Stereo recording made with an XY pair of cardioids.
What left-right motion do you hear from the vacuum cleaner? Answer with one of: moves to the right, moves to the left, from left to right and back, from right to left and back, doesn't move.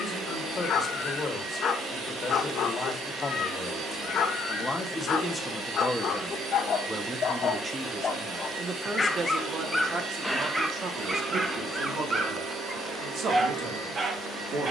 doesn't move.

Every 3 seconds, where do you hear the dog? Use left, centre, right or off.
left, left, left, centre, right.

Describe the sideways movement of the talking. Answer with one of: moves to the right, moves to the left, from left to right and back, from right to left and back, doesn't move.
moves to the right.